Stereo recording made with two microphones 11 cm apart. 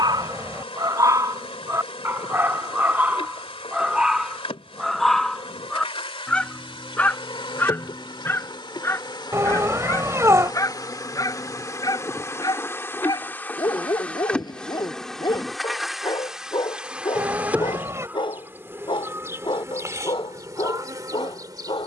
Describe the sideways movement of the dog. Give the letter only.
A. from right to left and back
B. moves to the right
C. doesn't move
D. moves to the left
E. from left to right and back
D.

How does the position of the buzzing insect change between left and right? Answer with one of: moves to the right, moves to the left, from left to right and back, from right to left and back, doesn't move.
moves to the right.